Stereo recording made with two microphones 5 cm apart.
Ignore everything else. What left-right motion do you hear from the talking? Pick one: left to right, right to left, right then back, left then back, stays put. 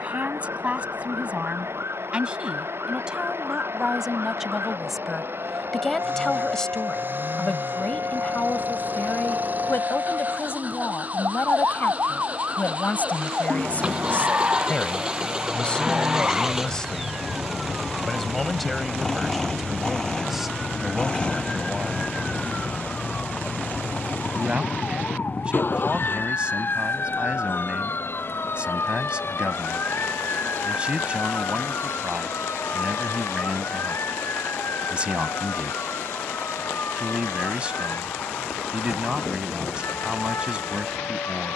left then back.